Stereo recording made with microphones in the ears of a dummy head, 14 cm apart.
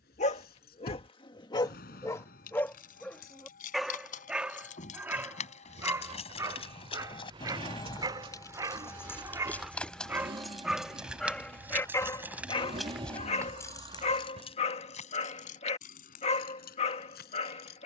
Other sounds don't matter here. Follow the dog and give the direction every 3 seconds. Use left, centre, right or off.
left, centre, right, centre, left, left.